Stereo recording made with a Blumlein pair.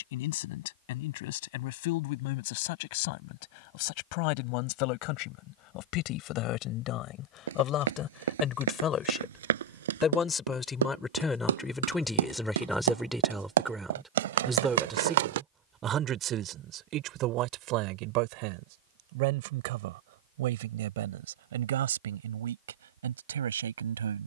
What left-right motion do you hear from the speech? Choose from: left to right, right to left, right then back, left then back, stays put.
left to right.